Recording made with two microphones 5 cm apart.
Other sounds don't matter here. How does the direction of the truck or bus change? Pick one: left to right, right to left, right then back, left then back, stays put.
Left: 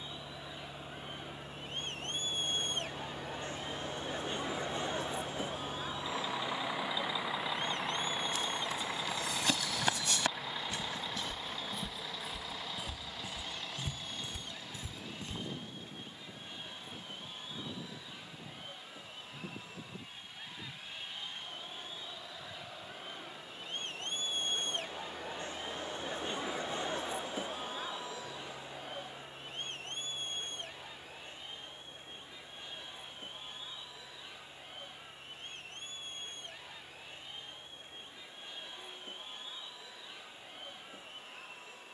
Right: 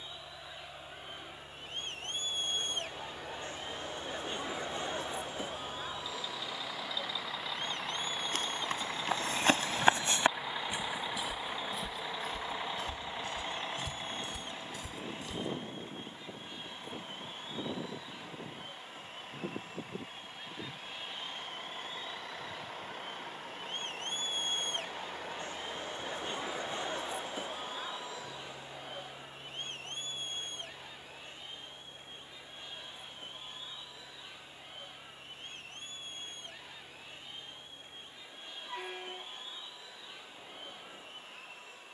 left to right.